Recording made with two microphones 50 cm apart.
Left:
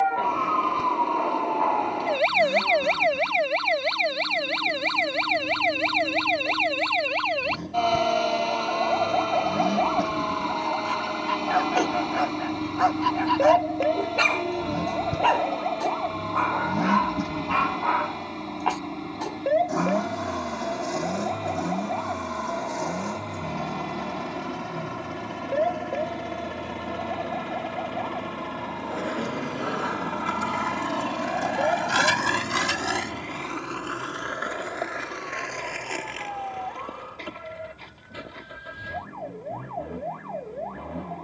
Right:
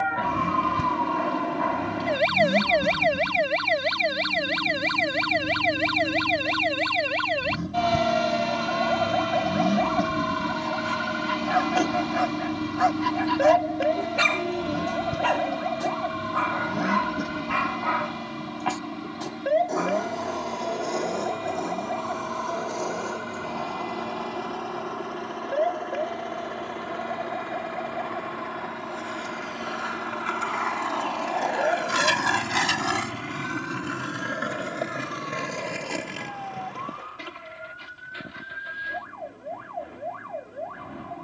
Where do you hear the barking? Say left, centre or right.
right.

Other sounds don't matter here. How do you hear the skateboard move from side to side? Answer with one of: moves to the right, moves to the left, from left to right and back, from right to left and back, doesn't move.
moves to the right.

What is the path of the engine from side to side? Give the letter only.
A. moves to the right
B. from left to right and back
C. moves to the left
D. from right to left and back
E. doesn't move
C.